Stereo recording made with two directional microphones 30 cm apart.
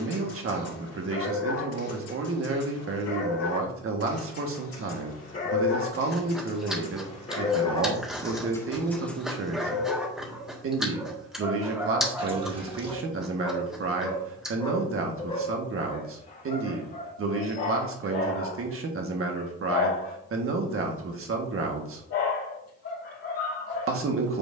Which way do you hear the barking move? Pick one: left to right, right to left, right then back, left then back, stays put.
right then back.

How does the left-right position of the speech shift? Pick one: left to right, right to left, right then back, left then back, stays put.
stays put.